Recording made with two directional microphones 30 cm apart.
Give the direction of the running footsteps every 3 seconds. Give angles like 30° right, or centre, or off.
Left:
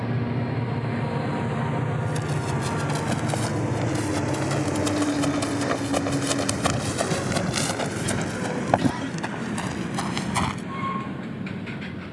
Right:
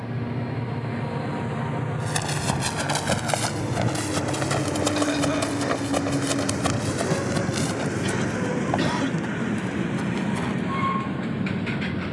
50° right, 30° right, 20° left, 50° left.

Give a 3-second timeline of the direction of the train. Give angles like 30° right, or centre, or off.
40° left, 10° left, 30° right, 60° right.